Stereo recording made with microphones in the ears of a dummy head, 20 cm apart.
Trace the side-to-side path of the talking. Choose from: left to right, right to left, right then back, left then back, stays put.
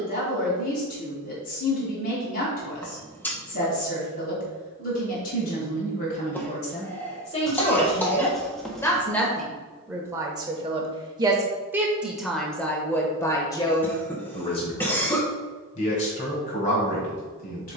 right then back.